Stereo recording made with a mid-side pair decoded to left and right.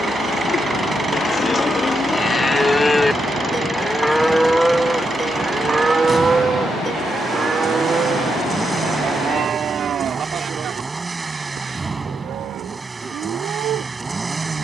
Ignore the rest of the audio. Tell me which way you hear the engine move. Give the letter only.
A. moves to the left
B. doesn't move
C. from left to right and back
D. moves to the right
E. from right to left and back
B.